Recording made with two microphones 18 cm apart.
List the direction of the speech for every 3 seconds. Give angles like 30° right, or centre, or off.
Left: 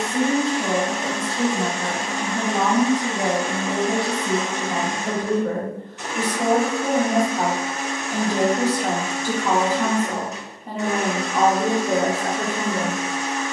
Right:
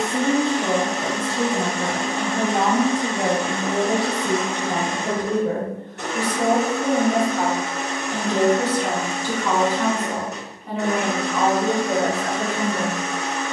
30° right, 30° right, centre, 30° left, 40° left.